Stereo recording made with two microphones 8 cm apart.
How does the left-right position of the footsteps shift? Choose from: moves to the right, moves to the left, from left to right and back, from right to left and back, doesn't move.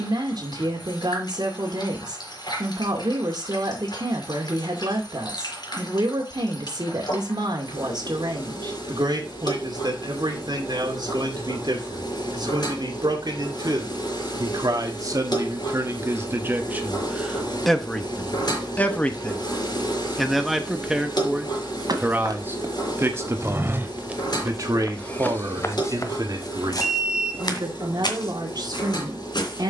moves to the left.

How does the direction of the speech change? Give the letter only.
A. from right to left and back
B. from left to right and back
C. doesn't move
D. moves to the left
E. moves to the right
A.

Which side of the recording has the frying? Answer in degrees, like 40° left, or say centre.
70° left.